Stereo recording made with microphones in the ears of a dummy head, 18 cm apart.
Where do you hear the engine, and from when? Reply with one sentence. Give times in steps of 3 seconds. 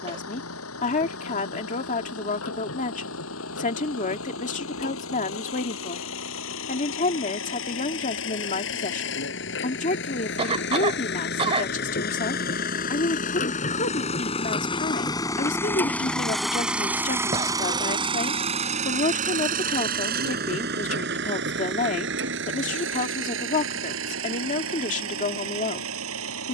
In this clip you hear the engine on the left from 0 s, in the centre from 15 s and on the right from 18 s.